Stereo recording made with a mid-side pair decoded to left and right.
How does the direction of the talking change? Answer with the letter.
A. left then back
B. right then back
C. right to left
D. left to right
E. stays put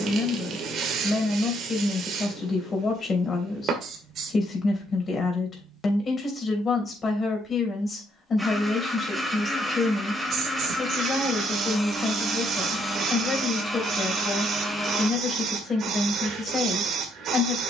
E.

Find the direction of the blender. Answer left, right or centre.
centre.